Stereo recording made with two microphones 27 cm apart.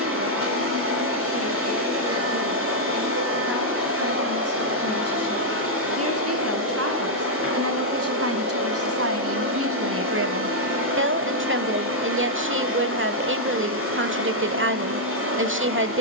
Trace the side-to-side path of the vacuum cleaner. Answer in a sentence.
In this clip you hear the vacuum cleaner stay put.